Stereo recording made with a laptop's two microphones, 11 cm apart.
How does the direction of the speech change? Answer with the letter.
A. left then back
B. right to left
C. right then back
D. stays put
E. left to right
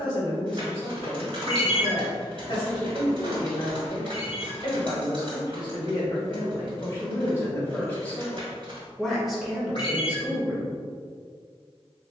E.